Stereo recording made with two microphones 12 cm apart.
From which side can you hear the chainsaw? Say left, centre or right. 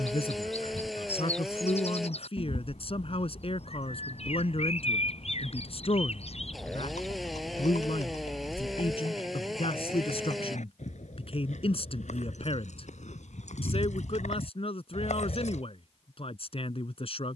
centre.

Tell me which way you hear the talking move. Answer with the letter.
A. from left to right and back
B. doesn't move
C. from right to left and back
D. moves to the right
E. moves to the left
B.